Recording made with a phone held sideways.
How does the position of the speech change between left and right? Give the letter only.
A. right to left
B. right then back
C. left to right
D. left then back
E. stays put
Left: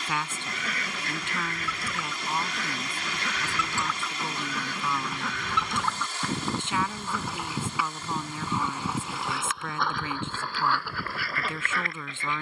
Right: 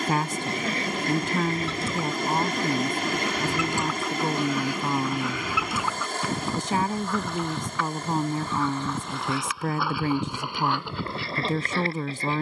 E.